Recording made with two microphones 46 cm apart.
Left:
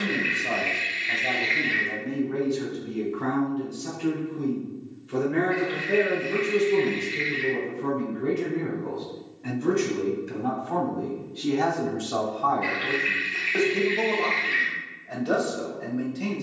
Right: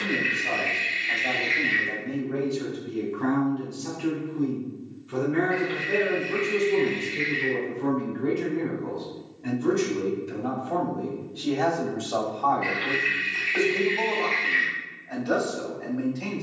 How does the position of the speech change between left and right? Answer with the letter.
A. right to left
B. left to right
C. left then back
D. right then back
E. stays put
D.